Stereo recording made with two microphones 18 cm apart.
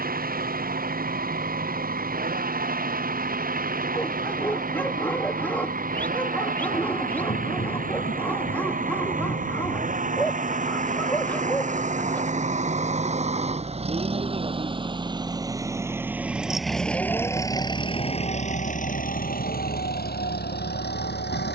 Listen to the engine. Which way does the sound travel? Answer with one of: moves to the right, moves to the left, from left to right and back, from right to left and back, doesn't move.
moves to the left.